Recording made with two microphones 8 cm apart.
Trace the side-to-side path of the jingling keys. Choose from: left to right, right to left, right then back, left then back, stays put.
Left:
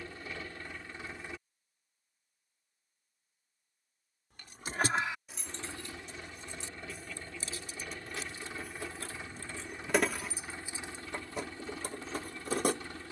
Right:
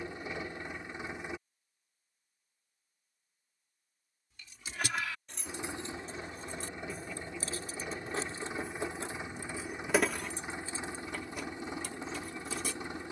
right then back.